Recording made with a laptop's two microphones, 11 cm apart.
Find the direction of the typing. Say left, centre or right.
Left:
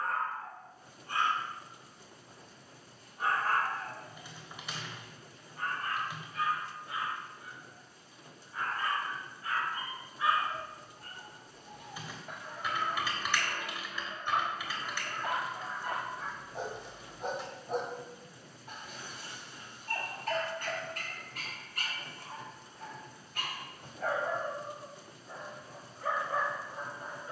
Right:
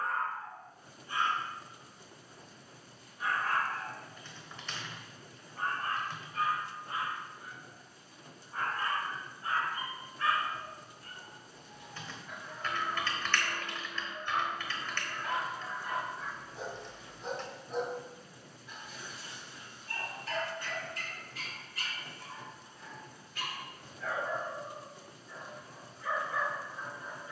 centre.